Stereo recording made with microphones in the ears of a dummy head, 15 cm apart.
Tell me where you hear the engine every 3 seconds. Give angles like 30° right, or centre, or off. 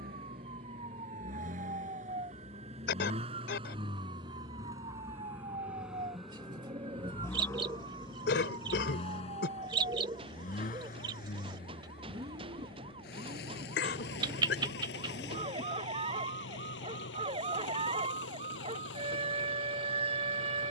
50° right, 20° right, 20° left, 40° left, 60° left, 70° left, 70° left.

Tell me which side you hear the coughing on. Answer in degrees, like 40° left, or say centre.
70° left.